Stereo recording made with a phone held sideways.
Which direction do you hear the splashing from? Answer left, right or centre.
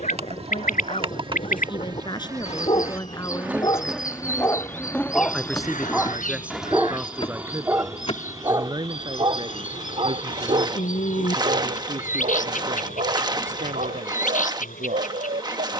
right.